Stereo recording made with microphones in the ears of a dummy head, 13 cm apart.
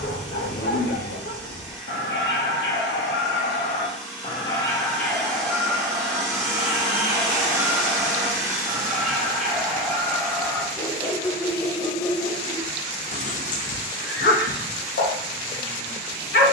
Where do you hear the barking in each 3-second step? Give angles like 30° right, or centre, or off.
80° left, 30° left, 10° right, 10° left, 50° left, 70° left.